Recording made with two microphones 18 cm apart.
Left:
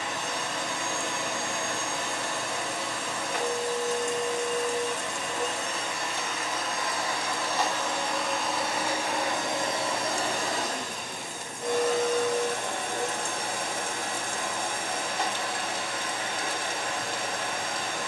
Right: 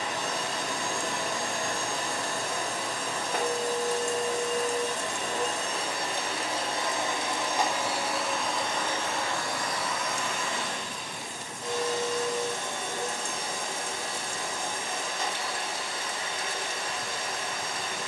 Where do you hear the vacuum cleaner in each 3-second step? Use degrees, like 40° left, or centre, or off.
40° right, 40° right, 10° right, 40° left, 60° left, 60° left.